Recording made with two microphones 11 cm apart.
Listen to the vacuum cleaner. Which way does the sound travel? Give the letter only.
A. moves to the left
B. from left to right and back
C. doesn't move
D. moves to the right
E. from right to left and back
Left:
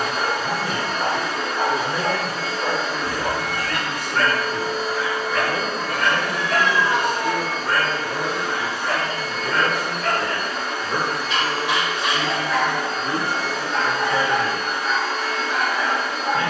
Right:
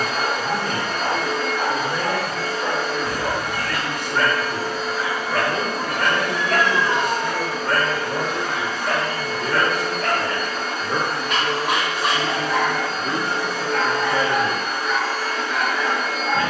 C.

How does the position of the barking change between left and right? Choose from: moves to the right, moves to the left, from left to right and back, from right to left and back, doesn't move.
from left to right and back.